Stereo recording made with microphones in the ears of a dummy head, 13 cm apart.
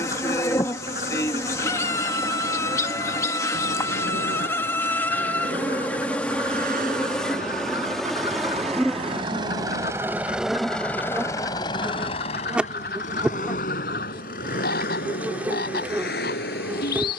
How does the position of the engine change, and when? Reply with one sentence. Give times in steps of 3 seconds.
You can hear the engine on the right from 0 s, in the centre from 9 s and on the left from 12 s.